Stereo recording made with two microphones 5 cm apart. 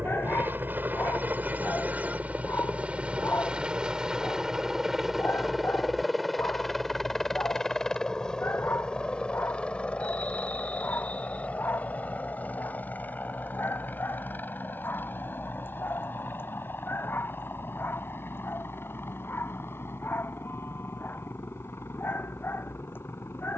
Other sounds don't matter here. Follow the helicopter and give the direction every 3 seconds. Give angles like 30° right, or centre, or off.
30° right, 10° right, 10° left, 20° left, 30° left, 40° left, 50° left, 50° left.